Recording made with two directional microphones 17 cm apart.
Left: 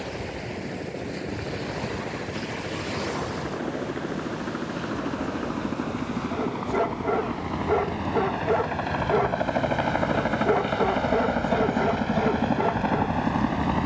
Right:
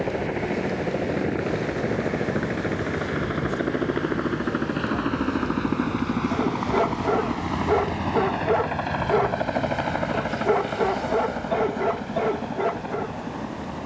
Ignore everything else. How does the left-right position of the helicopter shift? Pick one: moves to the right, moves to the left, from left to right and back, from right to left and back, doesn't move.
moves to the left.